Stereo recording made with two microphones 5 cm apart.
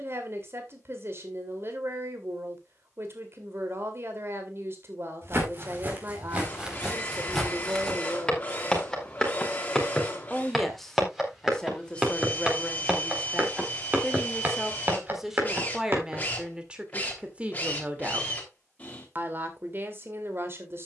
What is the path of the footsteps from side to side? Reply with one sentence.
In this clip you hear the footsteps move from right to left and back again.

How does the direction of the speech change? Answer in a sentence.
In this clip you hear the speech go left and come back.